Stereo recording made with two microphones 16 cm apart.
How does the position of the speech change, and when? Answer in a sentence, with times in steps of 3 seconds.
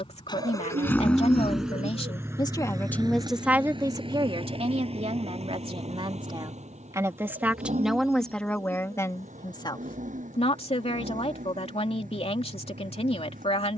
You can hear the speech on the left from 0 s, on the right from 3 s, in the centre from 6 s and on the left from 9 s.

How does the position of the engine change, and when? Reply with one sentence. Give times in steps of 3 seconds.
In this clip you hear the engine in the centre from 0 s and on the right from 3 s.